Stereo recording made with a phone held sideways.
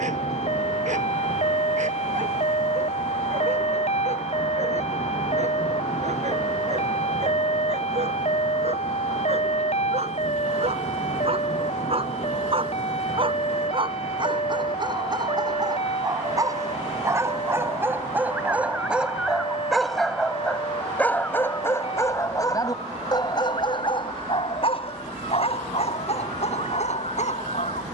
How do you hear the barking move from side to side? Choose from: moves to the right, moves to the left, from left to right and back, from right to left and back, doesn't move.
moves to the left.